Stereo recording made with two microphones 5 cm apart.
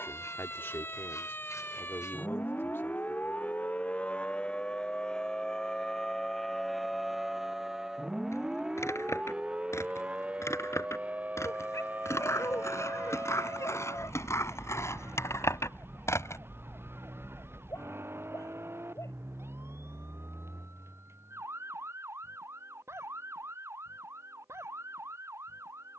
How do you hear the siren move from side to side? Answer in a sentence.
You can hear the siren go from the left side to the right.